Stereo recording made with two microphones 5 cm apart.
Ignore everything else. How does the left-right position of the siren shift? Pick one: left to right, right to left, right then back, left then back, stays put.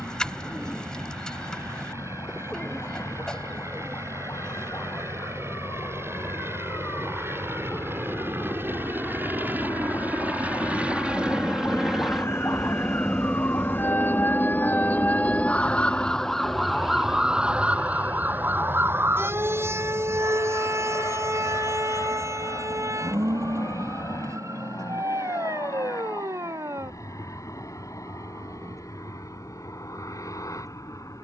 left to right.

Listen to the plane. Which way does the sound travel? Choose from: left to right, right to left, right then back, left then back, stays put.
right to left.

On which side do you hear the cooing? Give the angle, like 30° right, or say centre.
10° left.